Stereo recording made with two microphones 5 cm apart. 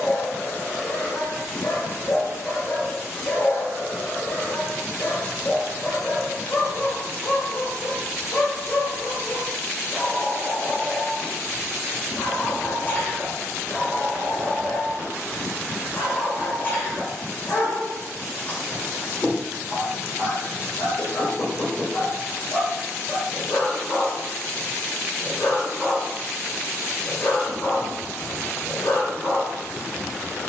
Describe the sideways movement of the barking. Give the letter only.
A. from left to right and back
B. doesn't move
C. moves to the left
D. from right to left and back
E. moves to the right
B.